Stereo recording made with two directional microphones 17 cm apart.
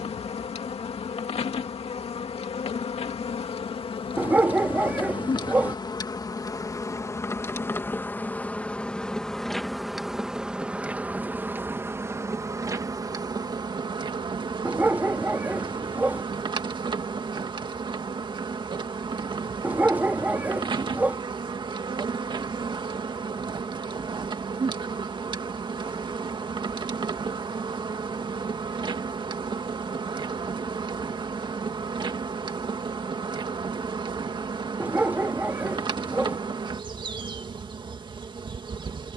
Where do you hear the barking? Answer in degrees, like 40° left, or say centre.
10° right.